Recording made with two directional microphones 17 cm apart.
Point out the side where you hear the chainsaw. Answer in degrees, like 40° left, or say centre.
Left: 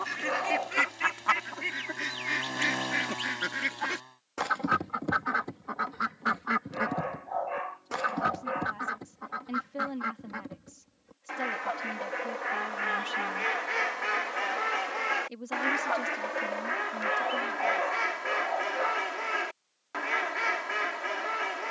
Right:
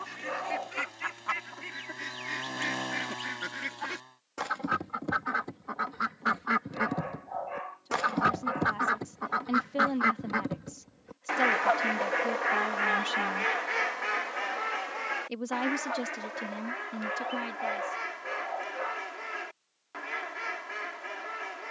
10° left.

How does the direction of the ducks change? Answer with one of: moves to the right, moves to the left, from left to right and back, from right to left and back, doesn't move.
from left to right and back.